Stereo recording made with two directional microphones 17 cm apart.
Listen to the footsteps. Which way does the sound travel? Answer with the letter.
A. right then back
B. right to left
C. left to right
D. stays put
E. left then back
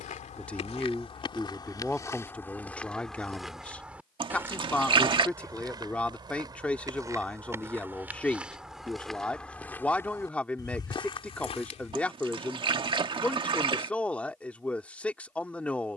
A.